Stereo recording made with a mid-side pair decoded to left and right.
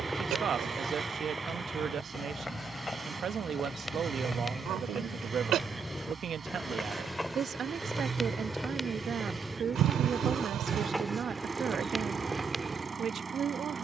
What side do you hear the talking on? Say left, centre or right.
right.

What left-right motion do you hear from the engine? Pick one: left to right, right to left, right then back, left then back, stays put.
stays put.